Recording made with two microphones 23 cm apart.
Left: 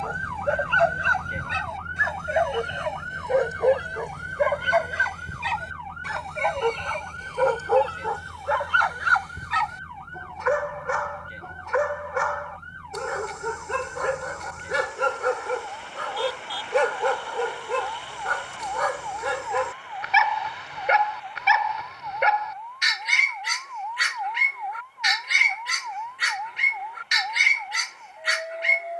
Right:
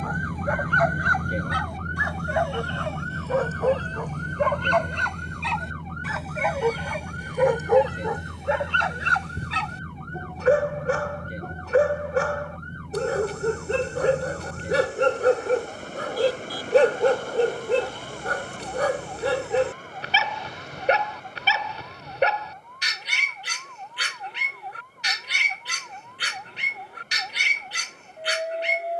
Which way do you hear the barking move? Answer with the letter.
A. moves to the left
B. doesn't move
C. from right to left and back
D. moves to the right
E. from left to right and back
D.